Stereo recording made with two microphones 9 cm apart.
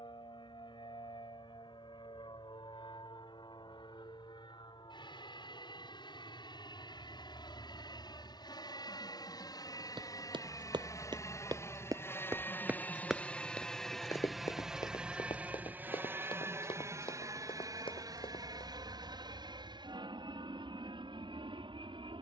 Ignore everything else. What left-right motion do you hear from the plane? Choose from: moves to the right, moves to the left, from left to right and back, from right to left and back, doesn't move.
moves to the right.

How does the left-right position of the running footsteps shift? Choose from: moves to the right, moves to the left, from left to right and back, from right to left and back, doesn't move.
moves to the left.